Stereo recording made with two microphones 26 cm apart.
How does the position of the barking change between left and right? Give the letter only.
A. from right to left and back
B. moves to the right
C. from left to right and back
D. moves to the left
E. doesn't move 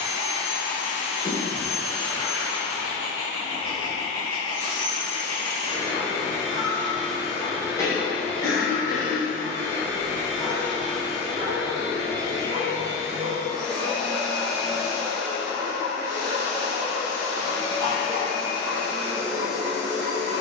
B.